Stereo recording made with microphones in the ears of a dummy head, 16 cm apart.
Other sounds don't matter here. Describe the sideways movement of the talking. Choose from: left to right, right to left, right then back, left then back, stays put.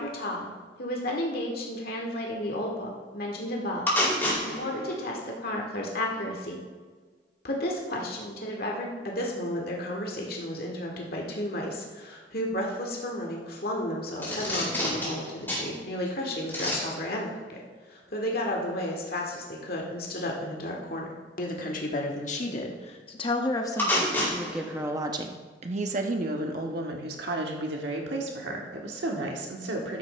left to right.